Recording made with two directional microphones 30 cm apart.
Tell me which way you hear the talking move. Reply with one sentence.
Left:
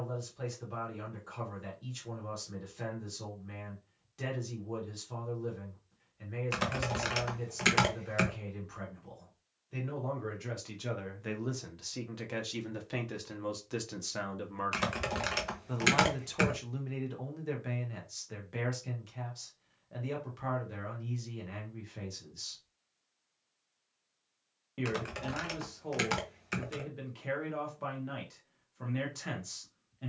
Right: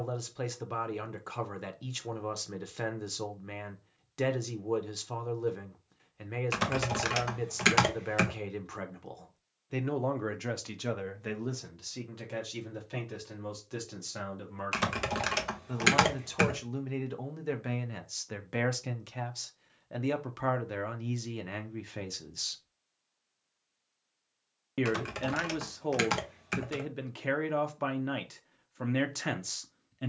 In this clip you hear the talking go left and come back.